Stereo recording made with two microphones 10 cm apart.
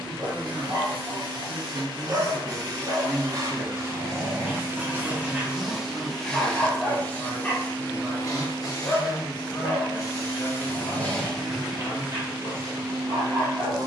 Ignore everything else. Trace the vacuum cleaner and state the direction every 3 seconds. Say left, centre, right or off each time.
right, right, left, left, right.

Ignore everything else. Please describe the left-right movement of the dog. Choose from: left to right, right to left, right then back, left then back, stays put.
left then back.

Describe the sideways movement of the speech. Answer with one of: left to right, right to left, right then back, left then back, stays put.
right to left.